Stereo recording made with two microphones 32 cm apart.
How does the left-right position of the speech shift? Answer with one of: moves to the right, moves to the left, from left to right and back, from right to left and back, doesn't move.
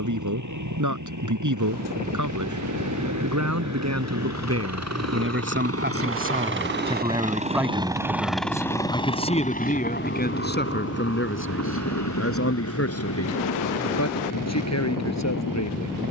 moves to the left.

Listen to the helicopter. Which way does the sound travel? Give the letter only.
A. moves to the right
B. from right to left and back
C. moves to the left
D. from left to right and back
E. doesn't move
C.